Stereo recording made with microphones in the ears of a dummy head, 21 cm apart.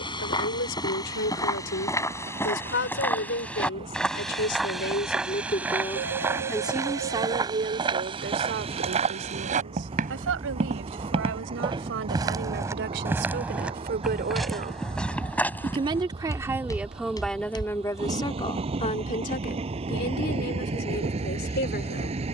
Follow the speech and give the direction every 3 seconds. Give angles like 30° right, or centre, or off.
50° left, 40° left, 30° right, 60° right, 50° right, 10° right, 30° left, 40° left.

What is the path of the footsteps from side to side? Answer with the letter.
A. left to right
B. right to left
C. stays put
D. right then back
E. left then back
D.